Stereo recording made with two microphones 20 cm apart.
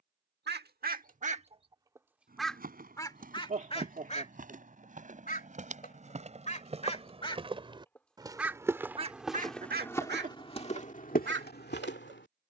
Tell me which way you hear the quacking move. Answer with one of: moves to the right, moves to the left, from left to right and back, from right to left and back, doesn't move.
from right to left and back.